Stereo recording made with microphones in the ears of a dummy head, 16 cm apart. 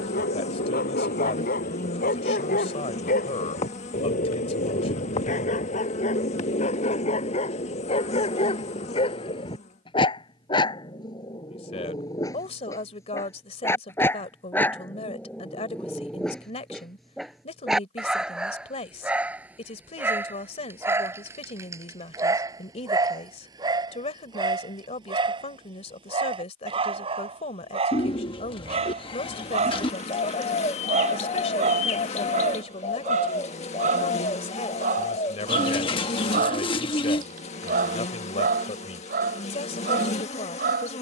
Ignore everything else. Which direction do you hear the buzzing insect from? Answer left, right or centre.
left.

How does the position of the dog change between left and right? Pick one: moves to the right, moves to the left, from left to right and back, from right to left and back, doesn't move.
moves to the right.